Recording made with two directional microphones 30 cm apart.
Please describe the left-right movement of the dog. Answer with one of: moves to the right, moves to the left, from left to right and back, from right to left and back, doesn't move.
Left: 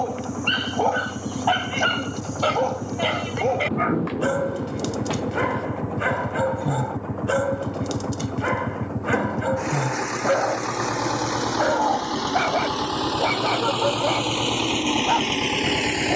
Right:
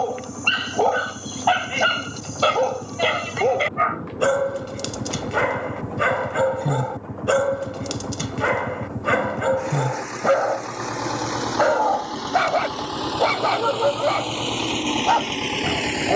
doesn't move.